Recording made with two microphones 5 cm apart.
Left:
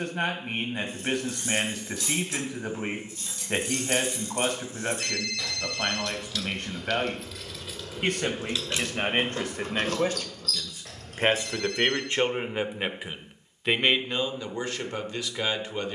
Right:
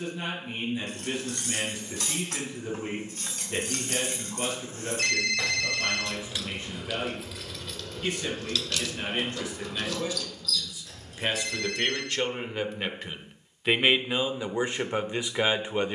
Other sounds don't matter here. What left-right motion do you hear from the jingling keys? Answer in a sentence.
In this clip you hear the jingling keys go from the right side to the left.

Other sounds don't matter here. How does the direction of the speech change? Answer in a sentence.
You can hear the speech move from left to right.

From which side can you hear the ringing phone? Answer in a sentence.
In this clip you hear the ringing phone on the right.